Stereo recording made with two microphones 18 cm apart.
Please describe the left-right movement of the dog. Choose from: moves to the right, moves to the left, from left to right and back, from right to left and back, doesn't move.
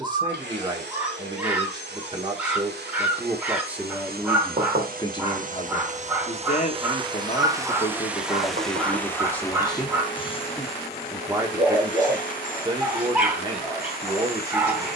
doesn't move.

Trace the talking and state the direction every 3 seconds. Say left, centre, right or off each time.
right, centre, left, centre, right.